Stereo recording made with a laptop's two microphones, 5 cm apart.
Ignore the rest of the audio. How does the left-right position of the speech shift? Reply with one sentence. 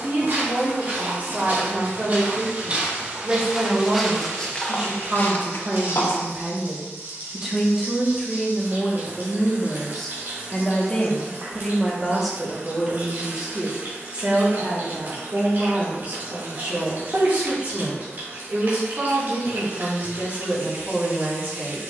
You can hear the speech move from right to left and back again.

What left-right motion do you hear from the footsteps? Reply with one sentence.
In this clip you hear the footsteps go from the right side to the left.